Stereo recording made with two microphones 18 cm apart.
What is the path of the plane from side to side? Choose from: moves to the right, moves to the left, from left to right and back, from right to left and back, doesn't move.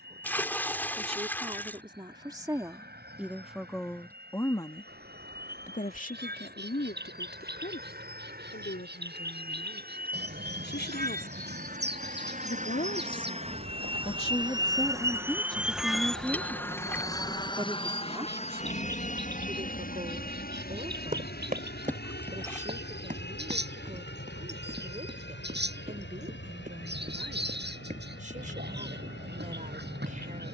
moves to the left.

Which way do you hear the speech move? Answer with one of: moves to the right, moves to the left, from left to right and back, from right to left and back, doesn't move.
from right to left and back.